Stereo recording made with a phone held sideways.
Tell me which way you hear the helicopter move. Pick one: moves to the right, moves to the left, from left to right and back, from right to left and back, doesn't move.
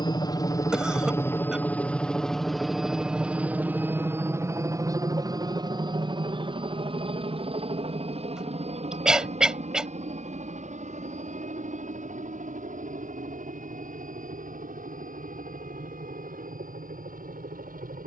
moves to the right.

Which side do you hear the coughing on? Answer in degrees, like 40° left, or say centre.
centre.